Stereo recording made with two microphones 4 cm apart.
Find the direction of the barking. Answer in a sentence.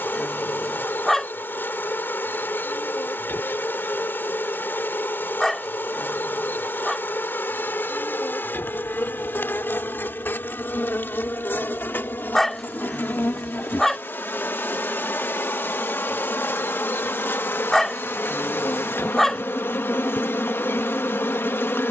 In this clip you hear the barking in the centre.